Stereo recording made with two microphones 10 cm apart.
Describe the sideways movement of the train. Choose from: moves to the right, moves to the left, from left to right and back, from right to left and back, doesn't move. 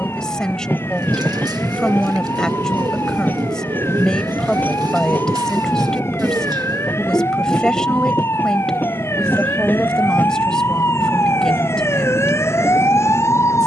doesn't move.